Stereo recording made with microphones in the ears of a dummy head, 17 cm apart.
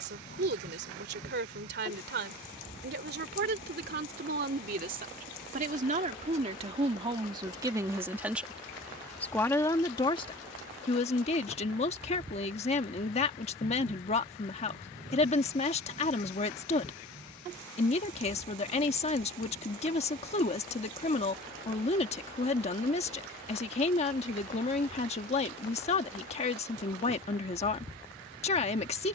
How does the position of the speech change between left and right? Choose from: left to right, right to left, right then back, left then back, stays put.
right to left.